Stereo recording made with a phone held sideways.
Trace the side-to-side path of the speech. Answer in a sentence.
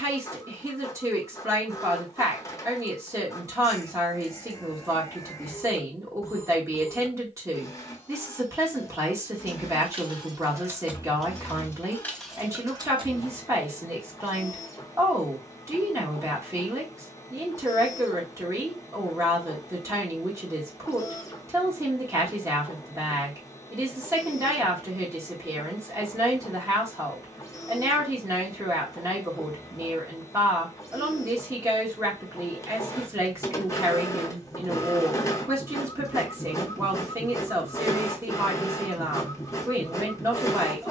You can hear the speech stay in one place.